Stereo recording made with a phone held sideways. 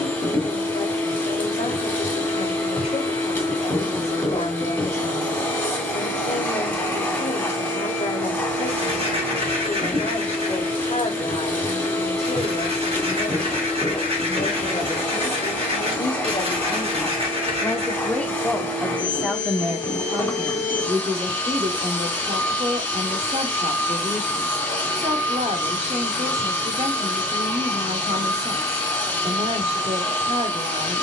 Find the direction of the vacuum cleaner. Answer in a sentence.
In this clip you hear the vacuum cleaner in the centre.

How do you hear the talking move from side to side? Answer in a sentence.
You can hear the talking move to the right.